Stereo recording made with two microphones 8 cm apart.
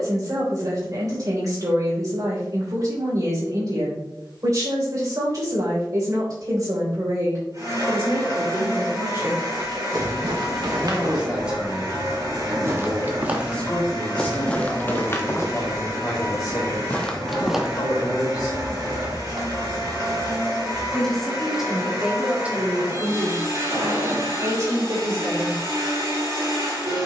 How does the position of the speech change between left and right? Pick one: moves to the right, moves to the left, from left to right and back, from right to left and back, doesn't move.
from right to left and back.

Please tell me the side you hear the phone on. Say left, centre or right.
right.